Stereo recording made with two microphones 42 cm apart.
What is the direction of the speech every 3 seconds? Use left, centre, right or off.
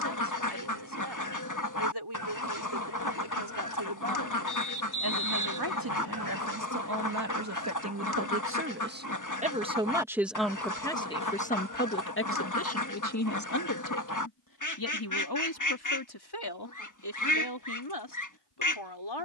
right, right, right, centre, left, left, left.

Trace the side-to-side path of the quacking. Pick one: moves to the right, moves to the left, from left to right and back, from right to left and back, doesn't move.
doesn't move.